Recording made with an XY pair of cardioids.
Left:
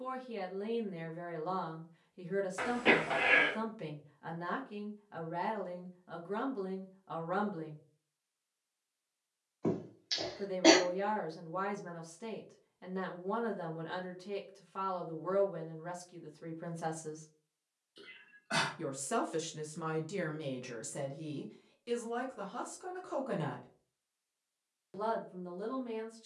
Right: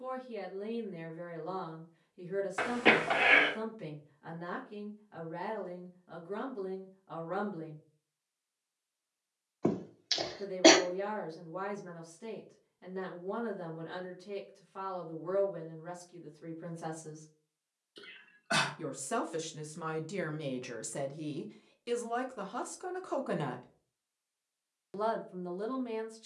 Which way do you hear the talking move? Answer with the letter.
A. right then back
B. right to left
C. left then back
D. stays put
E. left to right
E.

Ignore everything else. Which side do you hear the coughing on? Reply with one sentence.
You can hear the coughing on the right.